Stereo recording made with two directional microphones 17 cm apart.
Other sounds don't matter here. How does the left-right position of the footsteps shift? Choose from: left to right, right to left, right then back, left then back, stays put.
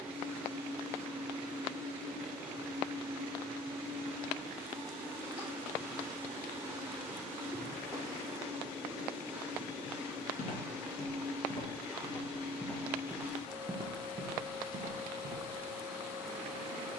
left to right.